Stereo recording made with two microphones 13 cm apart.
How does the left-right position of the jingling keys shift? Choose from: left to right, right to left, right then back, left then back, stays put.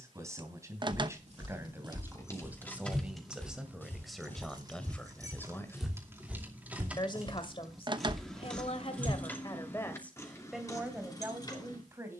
right then back.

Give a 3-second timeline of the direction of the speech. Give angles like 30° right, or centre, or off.
20° right, centre, 40° left, centre.